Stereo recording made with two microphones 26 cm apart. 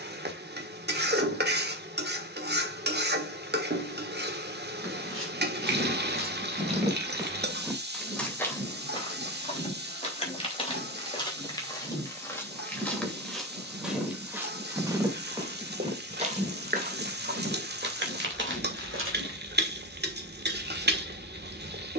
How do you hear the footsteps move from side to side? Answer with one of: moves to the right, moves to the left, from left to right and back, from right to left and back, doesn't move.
from right to left and back.